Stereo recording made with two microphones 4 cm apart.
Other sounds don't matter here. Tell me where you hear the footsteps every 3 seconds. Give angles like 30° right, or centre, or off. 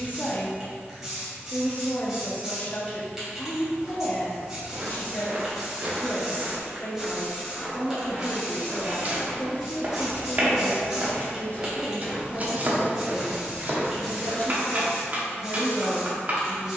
off, 50° right, centre, 30° left, 30° right, off.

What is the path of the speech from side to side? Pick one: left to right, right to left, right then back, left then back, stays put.
stays put.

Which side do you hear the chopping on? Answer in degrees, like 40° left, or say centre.
40° right.